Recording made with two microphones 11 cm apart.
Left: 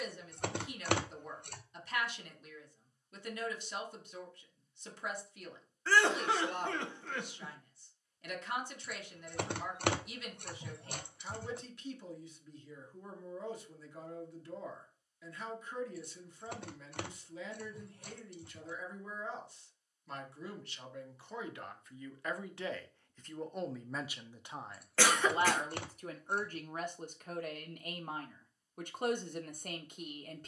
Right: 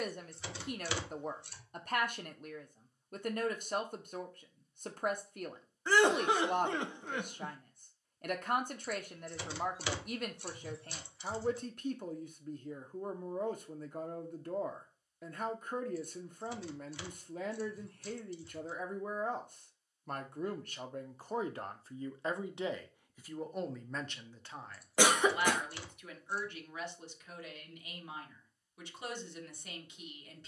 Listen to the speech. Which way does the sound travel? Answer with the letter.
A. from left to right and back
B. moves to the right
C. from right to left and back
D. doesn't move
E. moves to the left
E.